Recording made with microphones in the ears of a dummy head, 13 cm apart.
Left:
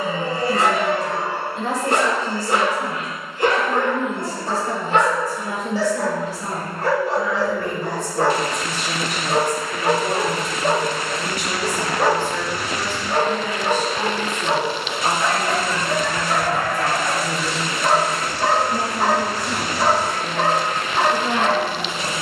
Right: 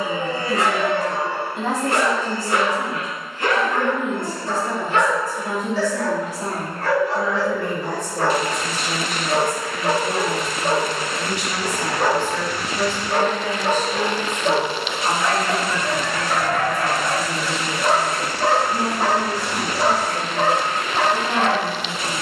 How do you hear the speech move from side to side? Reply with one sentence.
You can hear the speech travel towards the left.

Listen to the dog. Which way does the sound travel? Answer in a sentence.
You can hear the dog move from left to right.